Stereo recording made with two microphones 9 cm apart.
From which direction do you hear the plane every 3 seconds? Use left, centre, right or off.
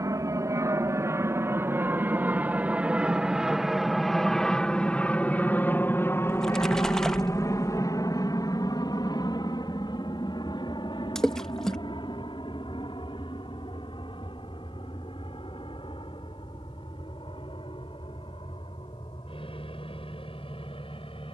right, centre, left, left, left, left, left.